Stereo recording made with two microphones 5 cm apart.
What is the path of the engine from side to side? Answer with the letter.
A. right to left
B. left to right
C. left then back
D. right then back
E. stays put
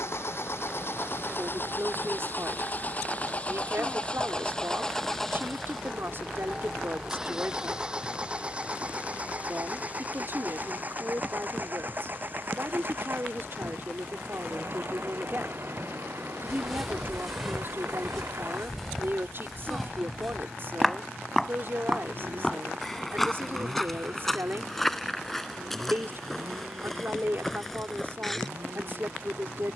B.